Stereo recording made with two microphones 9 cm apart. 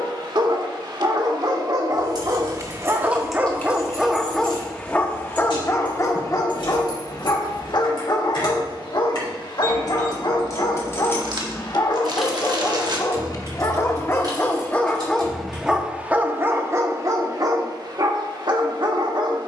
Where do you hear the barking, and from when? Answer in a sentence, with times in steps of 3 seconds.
In this clip you hear the barking on the right from 0 s, in the centre from 3 s, on the left from 6 s and on the right from 15 s.